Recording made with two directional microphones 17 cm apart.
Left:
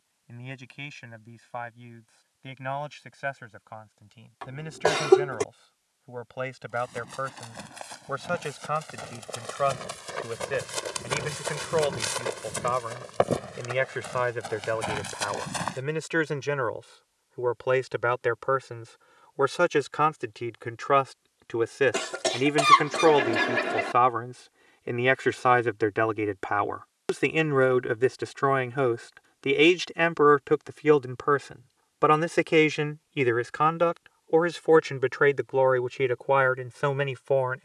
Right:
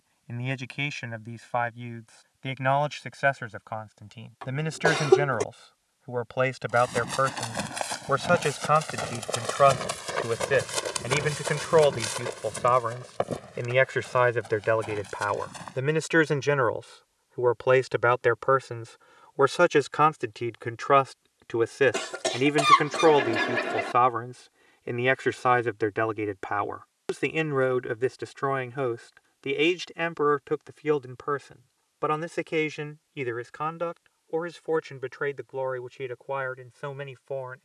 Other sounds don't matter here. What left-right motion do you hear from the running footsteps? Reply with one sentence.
In this clip you hear the running footsteps move from right to left.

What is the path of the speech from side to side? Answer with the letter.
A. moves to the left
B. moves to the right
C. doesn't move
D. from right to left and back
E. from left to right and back
A.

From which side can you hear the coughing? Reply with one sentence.
In this clip you hear the coughing in the centre.